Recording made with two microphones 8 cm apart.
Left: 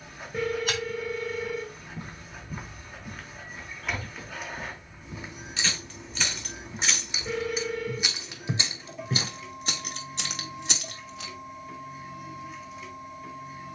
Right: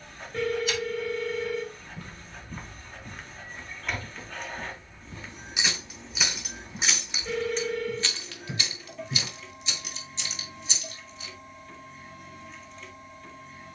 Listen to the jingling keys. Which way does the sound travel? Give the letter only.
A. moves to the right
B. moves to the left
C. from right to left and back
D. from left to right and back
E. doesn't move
B.